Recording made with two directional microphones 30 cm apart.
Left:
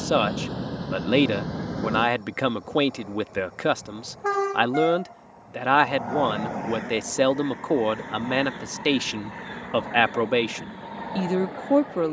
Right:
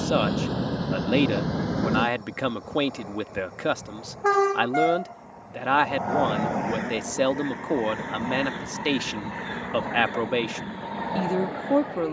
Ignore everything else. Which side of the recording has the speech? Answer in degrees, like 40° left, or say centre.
10° left.